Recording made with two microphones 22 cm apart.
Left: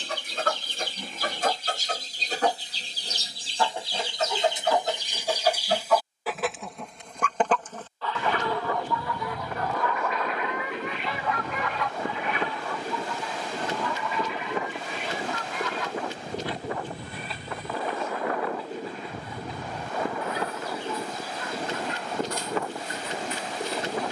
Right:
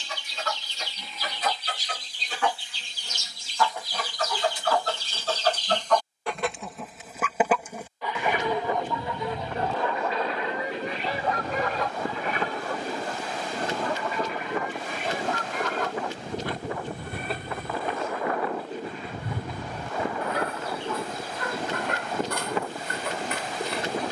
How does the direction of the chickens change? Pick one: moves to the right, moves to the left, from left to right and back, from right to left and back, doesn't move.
moves to the right.